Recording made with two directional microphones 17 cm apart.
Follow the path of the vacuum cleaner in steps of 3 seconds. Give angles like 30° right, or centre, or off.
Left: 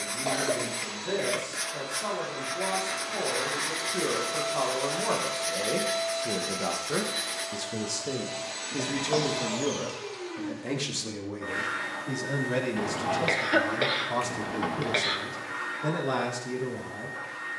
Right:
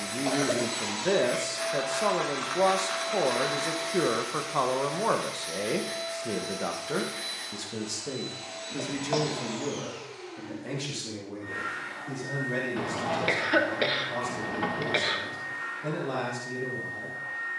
50° right, 20° left, 60° left, 60° left, 60° left, 60° left.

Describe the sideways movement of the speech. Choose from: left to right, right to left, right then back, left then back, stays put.
right to left.